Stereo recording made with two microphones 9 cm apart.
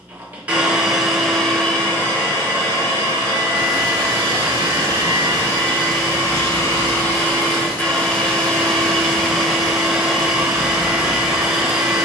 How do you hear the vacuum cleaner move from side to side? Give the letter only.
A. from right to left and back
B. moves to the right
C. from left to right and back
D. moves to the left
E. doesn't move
A.